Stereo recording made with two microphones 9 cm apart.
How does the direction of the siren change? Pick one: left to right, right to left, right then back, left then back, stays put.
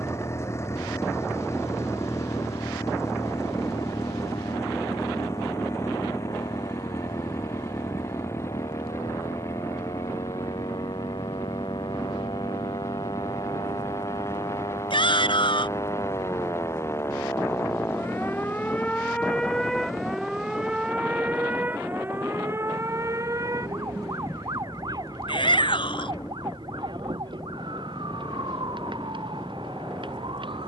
left to right.